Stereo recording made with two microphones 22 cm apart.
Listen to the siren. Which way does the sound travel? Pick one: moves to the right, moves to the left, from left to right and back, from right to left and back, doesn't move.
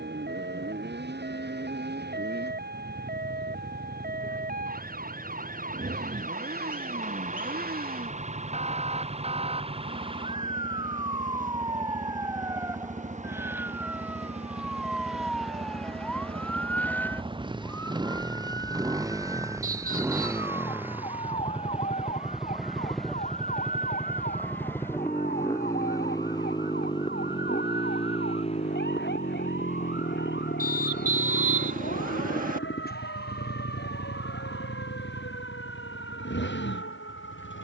moves to the left.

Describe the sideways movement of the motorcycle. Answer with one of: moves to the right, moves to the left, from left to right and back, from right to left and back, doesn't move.
moves to the left.